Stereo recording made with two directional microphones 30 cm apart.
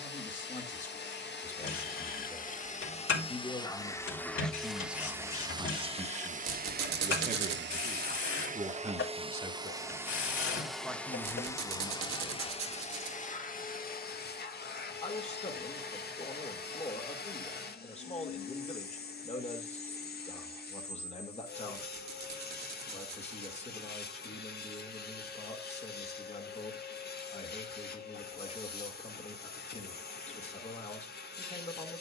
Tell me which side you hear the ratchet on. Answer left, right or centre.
left.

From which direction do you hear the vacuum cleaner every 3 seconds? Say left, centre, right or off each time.
left, centre, right, centre, left, left, left, left, left, left, left.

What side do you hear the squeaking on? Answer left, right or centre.
right.